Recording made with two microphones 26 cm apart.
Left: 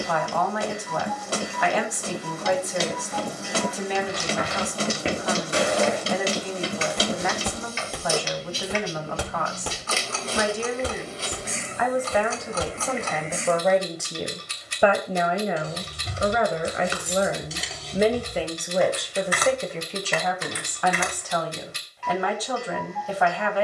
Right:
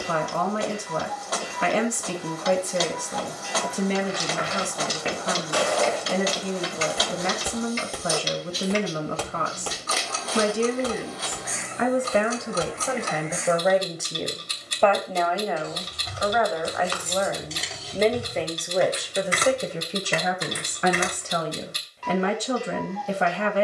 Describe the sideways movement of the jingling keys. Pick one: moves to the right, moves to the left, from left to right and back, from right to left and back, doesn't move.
moves to the right.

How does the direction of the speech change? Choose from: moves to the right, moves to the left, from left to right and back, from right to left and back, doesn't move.
from right to left and back.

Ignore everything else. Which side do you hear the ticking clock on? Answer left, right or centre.
right.